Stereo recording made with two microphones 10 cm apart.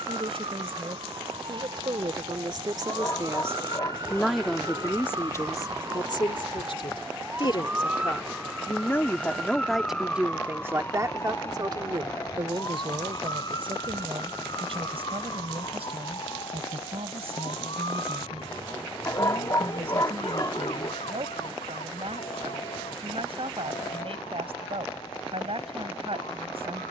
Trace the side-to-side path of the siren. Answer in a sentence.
You can hear the siren move to the left.